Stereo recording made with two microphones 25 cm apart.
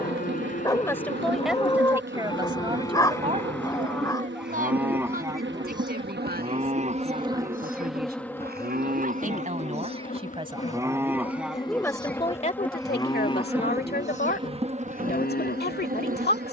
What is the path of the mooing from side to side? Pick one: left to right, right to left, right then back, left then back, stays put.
right then back.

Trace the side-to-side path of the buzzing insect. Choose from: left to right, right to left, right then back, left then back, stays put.
left then back.